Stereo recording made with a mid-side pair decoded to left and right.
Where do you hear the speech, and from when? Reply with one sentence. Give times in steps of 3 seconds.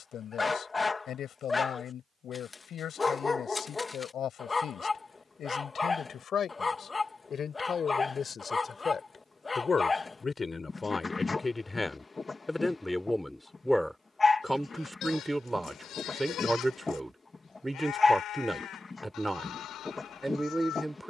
In this clip you hear the speech on the left from 0 s and in the centre from 12 s.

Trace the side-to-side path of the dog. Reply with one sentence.
In this clip you hear the dog stay in one place.